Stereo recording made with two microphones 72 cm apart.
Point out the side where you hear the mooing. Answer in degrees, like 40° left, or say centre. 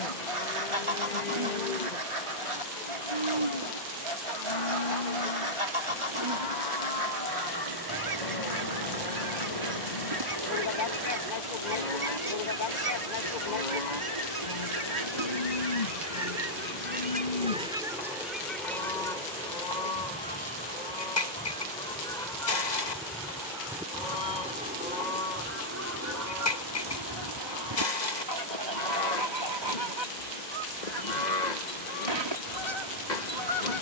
70° left.